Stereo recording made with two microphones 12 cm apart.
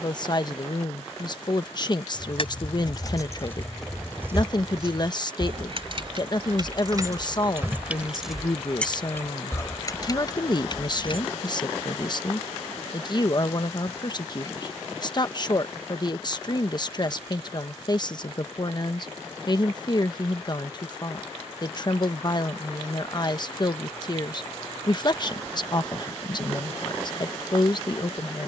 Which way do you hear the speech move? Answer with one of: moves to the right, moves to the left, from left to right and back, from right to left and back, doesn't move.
doesn't move.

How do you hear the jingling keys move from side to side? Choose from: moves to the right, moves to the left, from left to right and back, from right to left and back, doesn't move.
from left to right and back.